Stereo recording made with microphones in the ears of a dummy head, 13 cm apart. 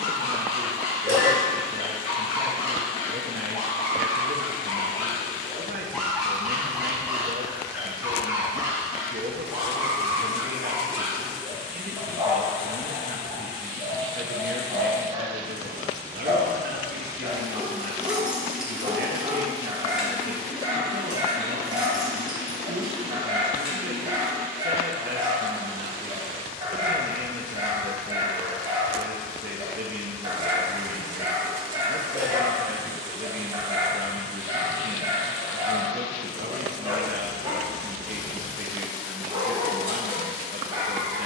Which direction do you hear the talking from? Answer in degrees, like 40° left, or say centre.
60° right.